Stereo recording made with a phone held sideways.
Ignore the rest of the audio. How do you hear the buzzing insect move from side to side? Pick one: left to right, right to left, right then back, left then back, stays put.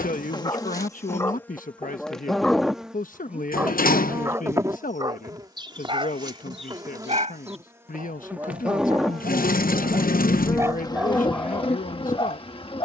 right then back.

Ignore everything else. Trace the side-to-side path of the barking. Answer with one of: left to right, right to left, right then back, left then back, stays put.
right then back.